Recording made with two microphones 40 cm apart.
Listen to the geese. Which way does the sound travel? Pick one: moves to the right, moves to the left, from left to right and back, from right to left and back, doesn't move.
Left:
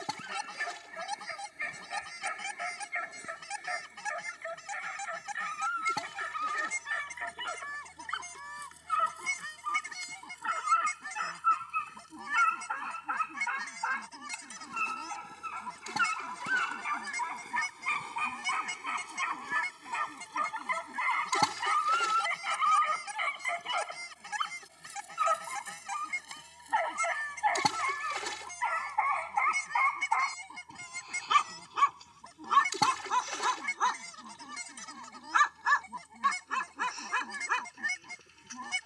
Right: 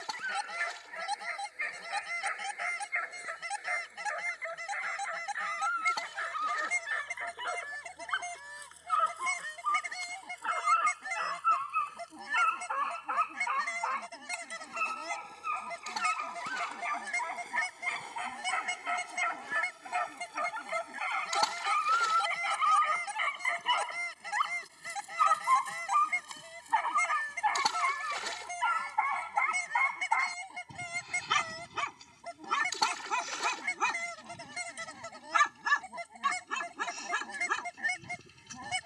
doesn't move.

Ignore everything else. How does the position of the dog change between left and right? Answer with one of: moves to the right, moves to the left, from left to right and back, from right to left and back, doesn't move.
moves to the right.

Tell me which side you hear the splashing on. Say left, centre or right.
left.